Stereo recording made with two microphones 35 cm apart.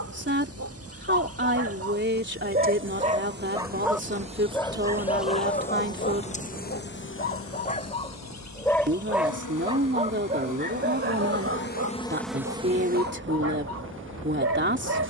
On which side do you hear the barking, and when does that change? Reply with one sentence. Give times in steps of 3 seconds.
In this clip you hear the barking on the right from 0 s, in the centre from 3 s, on the left from 6 s and on the right from 9 s.